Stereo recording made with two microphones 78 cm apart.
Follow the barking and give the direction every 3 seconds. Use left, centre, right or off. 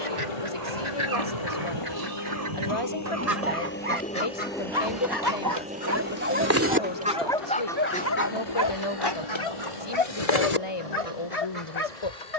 right, right, centre, left.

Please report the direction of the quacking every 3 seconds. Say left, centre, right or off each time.
right, right, centre, left.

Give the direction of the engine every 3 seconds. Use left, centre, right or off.
left, centre, right, right.